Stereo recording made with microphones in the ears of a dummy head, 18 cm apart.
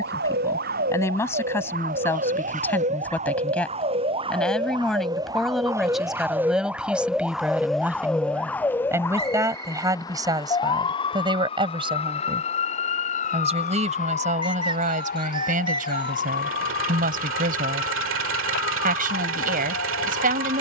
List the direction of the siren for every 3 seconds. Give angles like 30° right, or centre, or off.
40° right, 20° right, centre, 20° left, 40° left, 50° left, 50° left.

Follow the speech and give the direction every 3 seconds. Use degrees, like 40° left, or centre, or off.
10° left, centre, 10° right, 20° right, 30° right, 40° right, 40° right.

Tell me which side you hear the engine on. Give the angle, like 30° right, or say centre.
70° right.